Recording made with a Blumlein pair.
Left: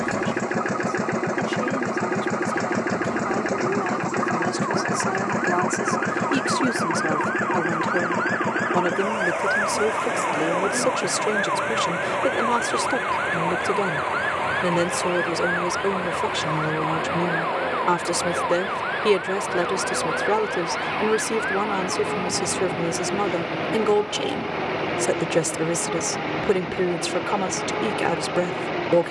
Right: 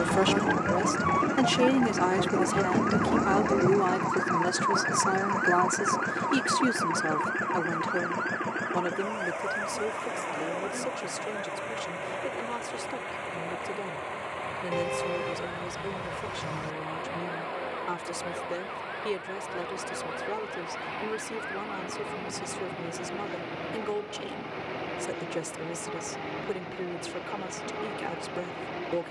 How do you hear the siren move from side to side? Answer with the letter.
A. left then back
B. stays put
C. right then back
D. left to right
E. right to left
E.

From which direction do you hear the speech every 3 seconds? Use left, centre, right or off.
right, centre, centre, left, left, left, left, left, left, left.